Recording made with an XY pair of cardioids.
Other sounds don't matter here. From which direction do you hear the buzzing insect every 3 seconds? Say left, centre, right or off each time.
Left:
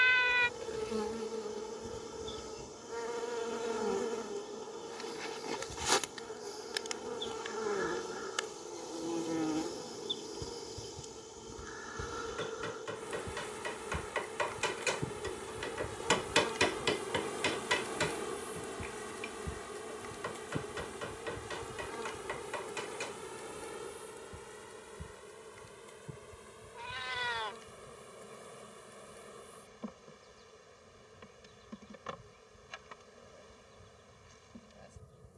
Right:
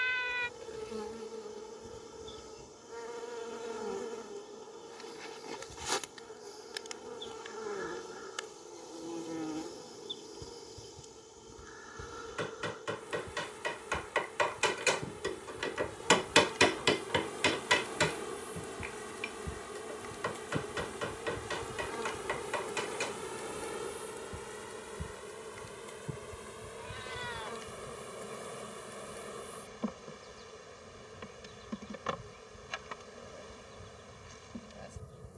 left, left, left, left, left, left, centre, right, right, right, right, right.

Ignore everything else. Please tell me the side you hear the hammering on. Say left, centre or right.
right.